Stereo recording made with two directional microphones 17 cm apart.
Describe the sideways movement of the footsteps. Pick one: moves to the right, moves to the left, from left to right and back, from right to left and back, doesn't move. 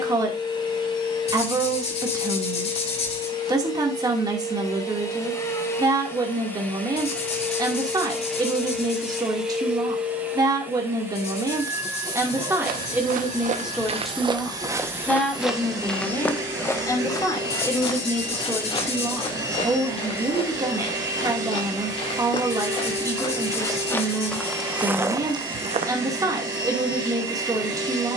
from right to left and back.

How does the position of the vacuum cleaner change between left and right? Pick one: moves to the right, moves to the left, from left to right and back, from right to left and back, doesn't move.
moves to the right.